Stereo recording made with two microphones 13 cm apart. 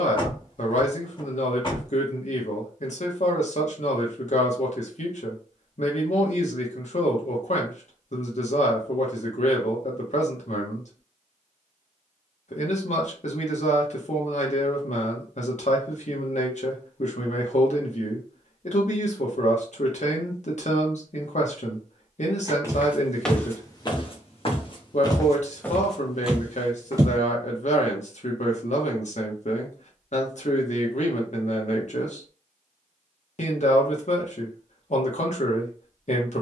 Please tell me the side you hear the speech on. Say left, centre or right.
left.